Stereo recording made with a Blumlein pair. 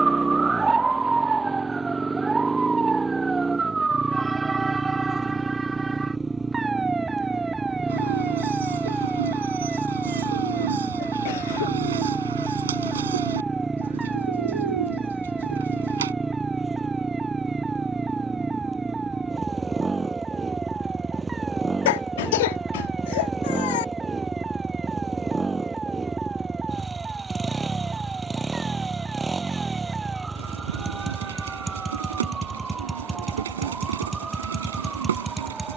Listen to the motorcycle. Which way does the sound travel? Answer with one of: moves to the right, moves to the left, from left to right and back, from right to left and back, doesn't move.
doesn't move.